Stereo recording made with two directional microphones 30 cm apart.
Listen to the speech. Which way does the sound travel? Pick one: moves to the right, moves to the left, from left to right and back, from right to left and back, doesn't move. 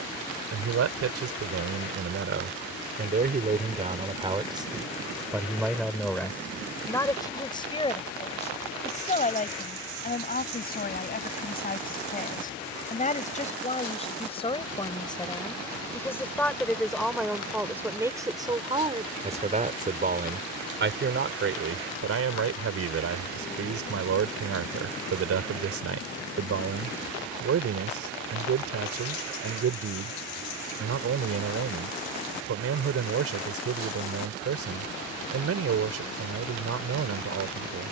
from right to left and back.